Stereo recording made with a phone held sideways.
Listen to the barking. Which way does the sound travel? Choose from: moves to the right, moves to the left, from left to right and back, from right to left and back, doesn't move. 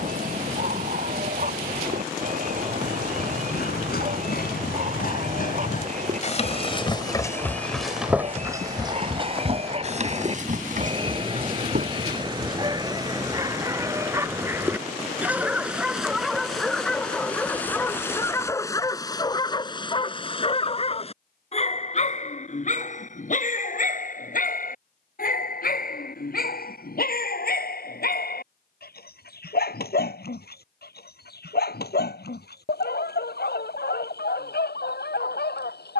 moves to the left.